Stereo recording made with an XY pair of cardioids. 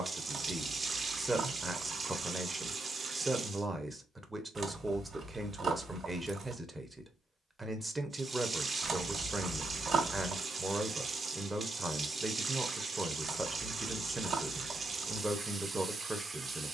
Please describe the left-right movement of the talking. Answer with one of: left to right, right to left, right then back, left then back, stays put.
stays put.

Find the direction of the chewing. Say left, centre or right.
right.